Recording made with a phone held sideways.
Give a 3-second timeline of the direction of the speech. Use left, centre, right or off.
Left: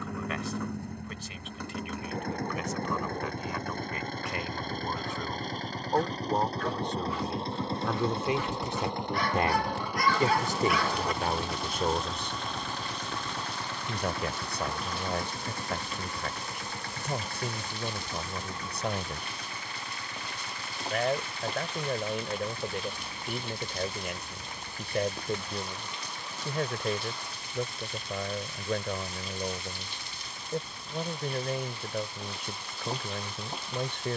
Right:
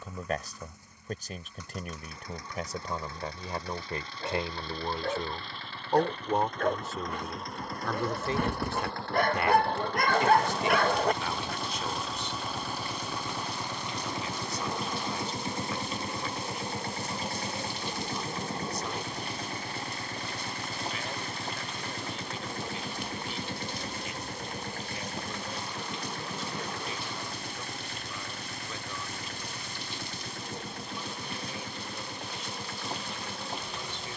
right, right, centre, left, left, left, left, left, left, left, left, left.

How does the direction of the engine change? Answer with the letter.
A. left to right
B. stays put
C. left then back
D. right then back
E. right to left
A.